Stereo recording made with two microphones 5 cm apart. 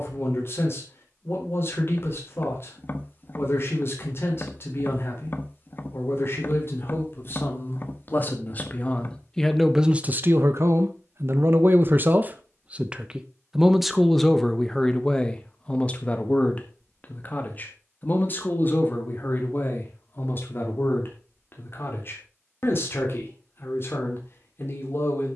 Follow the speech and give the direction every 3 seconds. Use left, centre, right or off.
left, left, left, right, centre, left, left, left, left.